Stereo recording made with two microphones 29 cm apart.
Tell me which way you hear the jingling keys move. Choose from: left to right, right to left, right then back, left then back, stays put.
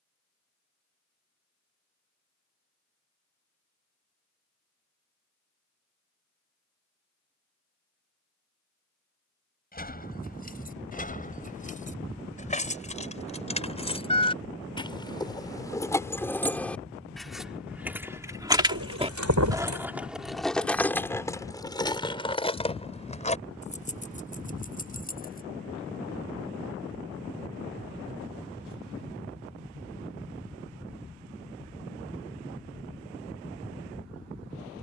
right then back.